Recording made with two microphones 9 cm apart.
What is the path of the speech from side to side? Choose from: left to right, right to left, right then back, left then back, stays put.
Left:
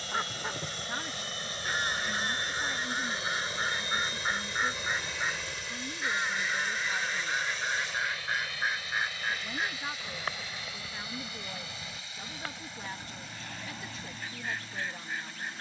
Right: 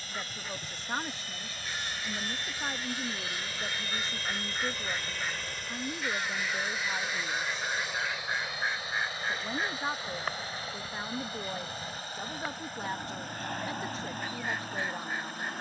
stays put.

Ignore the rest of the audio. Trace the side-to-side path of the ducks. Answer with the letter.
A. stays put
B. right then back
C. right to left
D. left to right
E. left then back
D.